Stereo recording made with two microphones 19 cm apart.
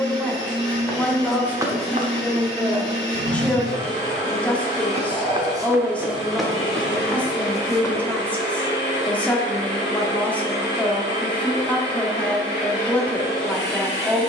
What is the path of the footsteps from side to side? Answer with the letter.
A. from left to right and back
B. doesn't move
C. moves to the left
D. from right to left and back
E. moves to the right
A.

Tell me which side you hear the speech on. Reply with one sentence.
You can hear the speech in the centre.